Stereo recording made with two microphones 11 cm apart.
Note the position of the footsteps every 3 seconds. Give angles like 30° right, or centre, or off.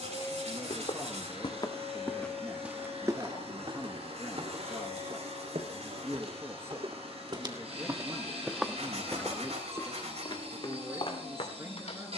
20° left, 60° right, 30° right, 40° left.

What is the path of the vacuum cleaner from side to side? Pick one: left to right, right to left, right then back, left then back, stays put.
stays put.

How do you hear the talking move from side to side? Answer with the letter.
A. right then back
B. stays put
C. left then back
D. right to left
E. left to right
B.